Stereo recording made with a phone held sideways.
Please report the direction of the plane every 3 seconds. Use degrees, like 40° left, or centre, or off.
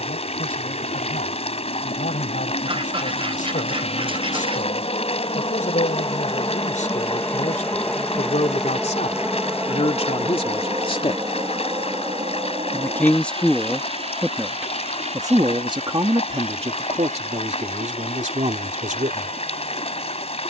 60° left, 40° left, 10° left, 20° right, 40° right, 50° right, 60° right.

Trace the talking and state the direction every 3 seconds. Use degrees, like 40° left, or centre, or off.
70° left, 70° left, 60° left, 40° left, centre, 40° right, 60° right.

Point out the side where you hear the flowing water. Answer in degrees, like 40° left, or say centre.
50° left.